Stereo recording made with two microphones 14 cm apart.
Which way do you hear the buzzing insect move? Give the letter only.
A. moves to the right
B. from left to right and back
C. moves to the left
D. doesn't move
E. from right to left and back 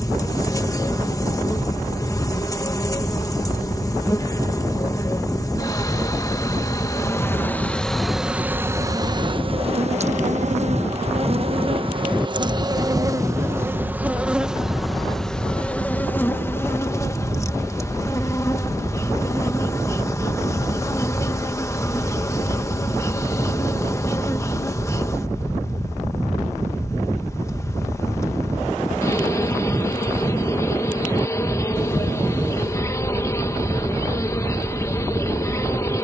B.